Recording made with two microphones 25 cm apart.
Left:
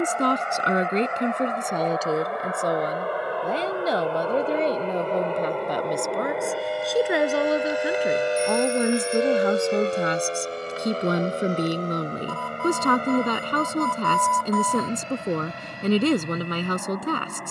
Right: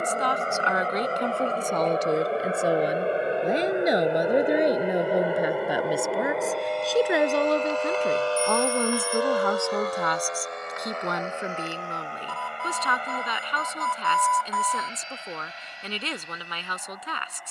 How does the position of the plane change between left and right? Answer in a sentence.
In this clip you hear the plane move to the left.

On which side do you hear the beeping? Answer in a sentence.
You can hear the beeping on the left.